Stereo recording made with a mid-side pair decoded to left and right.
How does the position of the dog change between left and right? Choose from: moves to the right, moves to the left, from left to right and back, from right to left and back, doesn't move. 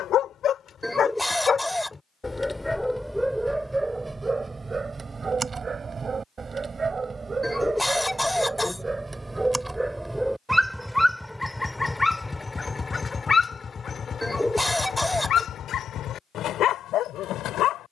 from left to right and back.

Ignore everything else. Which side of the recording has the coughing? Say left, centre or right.
centre.